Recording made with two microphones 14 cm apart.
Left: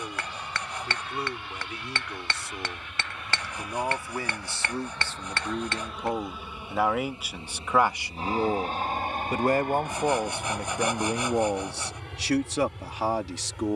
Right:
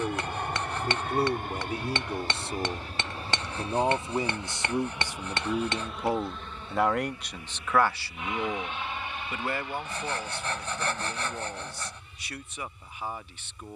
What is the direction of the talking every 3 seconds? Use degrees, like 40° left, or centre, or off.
30° right, 20° right, 10° left, 60° left, 80° left.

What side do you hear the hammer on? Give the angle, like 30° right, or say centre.
20° right.